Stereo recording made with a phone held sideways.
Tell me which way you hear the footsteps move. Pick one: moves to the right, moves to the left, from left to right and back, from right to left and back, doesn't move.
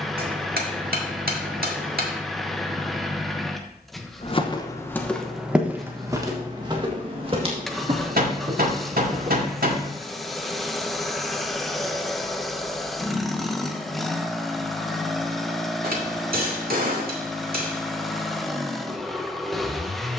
moves to the right.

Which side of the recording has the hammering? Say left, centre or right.
right.